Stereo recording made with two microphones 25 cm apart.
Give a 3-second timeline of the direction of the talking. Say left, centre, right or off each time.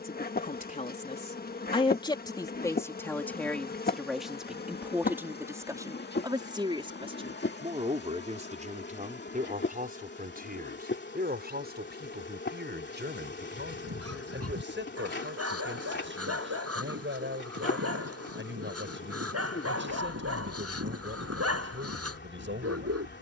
left, centre, right, right, right, right, right, right.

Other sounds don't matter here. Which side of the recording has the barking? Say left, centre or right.
right.